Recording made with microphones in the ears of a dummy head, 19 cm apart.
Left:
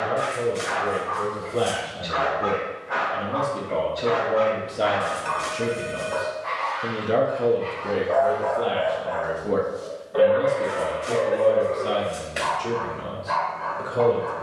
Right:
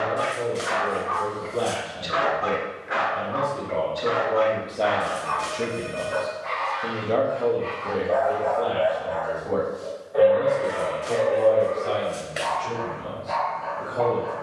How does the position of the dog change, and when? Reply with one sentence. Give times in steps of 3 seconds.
You can hear the dog on the right from 0 s and in the centre from 3 s.